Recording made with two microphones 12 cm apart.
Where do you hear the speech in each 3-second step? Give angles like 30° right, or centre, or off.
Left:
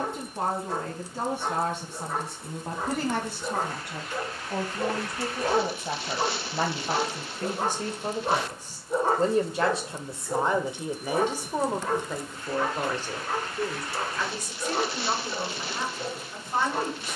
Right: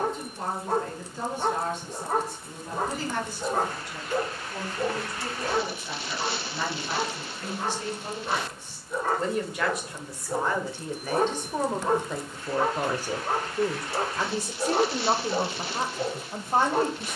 70° left, 60° left, 50° left, 20° left, 20° right, 40° right.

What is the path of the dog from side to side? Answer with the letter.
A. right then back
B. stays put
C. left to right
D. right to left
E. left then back
E.